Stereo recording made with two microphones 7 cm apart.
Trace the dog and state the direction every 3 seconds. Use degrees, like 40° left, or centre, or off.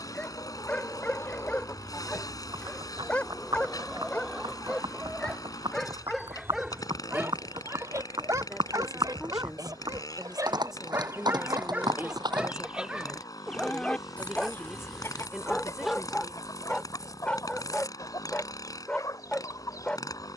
20° left, 20° left, 20° right, 30° right, 10° right, 10° left, 20° left.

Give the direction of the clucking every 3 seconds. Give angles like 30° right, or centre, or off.
30° left, centre, 40° right, 50° right, centre, 50° left, 50° left.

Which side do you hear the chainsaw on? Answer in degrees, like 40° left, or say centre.
60° left.